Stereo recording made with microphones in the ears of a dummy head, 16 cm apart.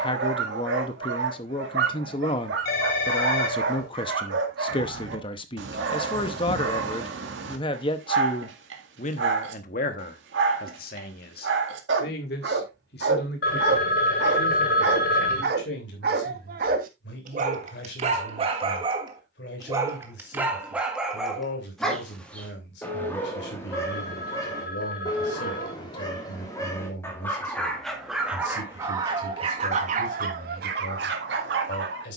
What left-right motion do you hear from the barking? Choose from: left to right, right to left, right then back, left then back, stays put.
left then back.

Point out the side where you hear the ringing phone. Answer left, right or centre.
left.